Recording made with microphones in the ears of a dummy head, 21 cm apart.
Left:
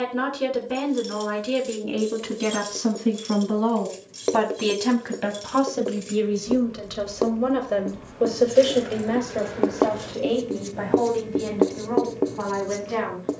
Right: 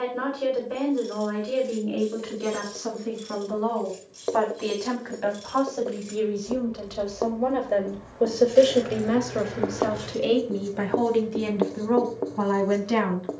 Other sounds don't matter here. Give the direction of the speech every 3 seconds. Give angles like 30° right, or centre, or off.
70° left, 50° left, 20° left, 30° right, 50° right.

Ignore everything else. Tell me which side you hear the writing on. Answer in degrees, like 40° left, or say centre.
40° left.